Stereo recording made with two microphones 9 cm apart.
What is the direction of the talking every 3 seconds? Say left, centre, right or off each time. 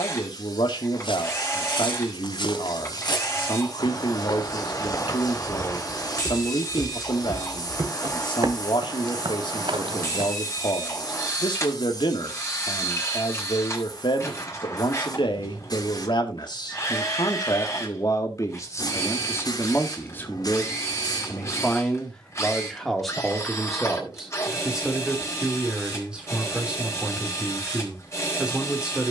left, left, left, left, left, left, left, centre, centre, centre.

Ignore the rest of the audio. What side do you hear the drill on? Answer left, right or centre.
left.